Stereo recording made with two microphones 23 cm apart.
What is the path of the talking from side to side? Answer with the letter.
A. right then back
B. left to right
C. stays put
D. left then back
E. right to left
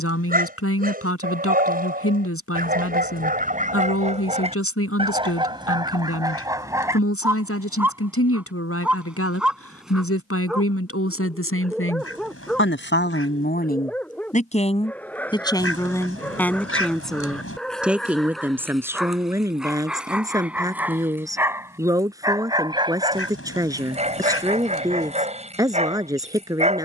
B.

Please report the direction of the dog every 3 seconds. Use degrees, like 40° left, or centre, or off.
40° right, 30° right, 10° right, centre, centre, centre, centre, 20° right, 30° right.